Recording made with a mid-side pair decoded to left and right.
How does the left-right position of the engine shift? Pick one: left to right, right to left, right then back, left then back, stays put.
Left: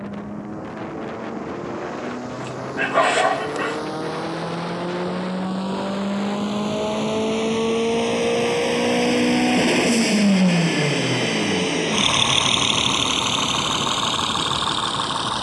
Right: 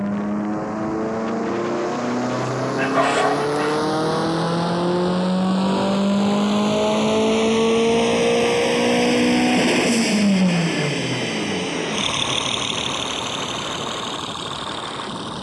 right to left.